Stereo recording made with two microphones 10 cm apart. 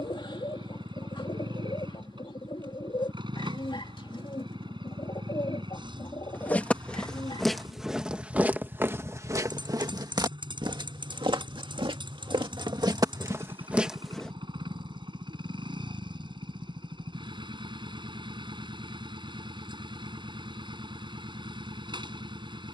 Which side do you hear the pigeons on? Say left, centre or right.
left.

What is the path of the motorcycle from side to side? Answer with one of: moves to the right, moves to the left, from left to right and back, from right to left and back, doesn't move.
doesn't move.